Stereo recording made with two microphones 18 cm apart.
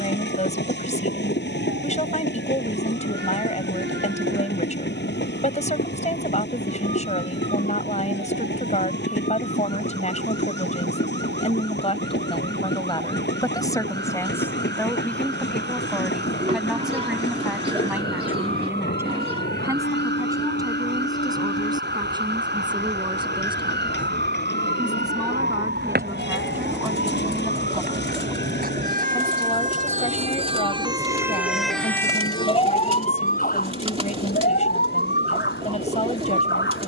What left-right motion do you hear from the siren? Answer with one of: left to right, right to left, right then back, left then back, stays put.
right to left.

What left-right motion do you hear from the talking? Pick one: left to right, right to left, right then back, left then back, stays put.
right then back.